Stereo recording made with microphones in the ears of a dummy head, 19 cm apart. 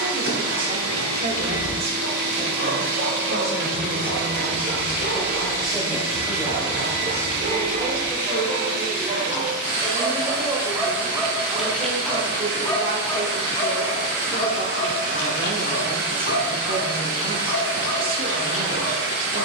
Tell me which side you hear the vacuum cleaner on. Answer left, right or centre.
right.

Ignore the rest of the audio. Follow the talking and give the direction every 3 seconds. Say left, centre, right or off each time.
right, centre, centre, centre, right, right, right.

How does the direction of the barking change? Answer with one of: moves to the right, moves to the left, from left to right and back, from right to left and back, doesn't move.
moves to the left.